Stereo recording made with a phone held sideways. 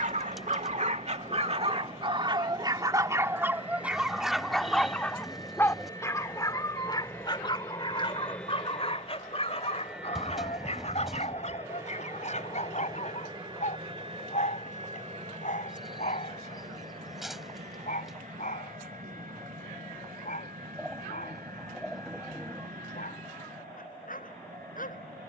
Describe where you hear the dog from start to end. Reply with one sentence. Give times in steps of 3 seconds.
You can hear the dog on the right from 0 s, in the centre from 3 s and on the left from 6 s.